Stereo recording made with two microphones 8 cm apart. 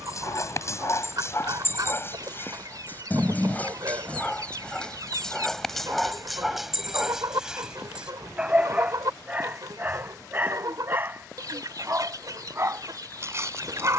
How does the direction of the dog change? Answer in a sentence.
You can hear the dog move from left to right.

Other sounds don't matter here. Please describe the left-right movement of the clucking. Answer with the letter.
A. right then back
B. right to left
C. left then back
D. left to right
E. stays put
E.